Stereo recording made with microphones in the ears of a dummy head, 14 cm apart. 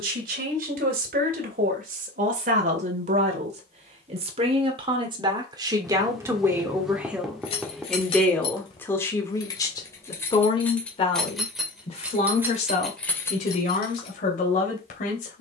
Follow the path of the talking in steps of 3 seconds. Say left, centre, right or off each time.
right, right, centre, left, left.